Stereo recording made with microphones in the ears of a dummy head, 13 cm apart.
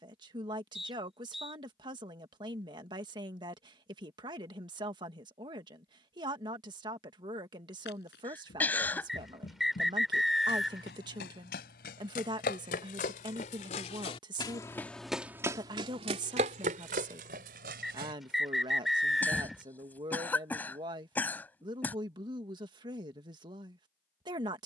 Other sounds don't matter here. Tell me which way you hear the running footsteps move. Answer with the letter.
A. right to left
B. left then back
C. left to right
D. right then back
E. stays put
C.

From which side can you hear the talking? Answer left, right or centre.
right.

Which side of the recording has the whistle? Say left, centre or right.
centre.